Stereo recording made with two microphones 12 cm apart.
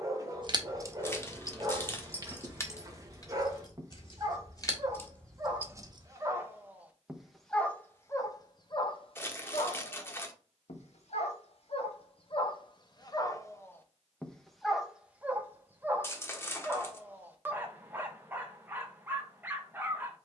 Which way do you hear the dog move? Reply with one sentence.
You can hear the dog go left and come back.